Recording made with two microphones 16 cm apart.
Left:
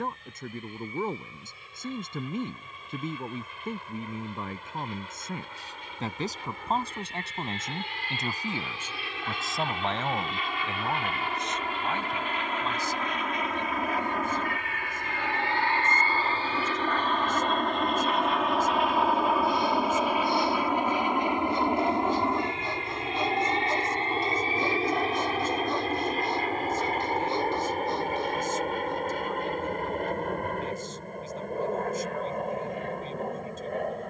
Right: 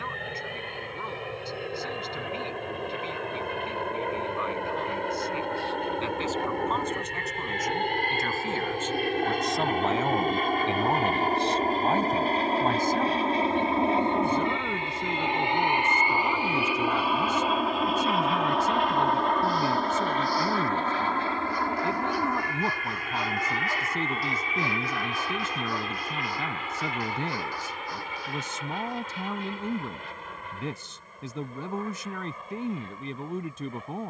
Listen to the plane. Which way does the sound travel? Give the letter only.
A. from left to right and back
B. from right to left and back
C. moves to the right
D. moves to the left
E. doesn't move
D.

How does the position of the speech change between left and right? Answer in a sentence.
You can hear the speech move to the right.